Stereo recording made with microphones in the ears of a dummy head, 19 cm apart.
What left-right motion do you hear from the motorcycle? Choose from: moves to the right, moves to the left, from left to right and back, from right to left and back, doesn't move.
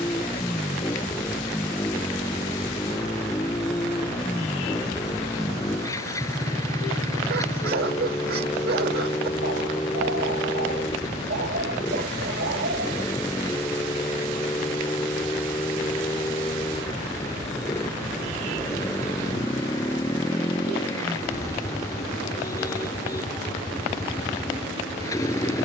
doesn't move.